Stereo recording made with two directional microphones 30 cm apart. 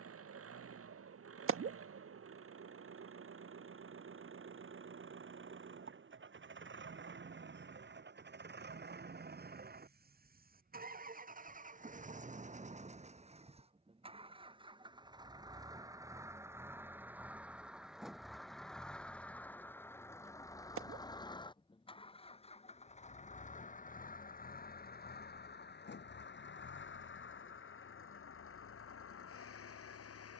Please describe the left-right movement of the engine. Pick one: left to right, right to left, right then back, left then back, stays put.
right to left.